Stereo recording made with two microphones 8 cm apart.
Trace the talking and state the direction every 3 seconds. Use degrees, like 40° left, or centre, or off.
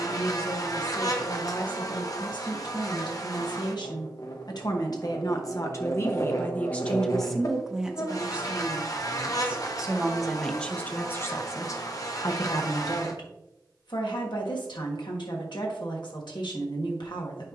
70° left, 60° left, centre, 10° left, 70° left, 70° left.